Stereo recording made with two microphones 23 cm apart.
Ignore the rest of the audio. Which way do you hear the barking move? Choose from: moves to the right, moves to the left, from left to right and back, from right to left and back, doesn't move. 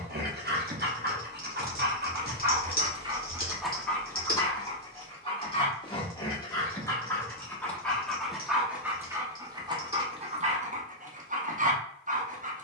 from right to left and back.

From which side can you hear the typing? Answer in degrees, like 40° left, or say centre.
40° left.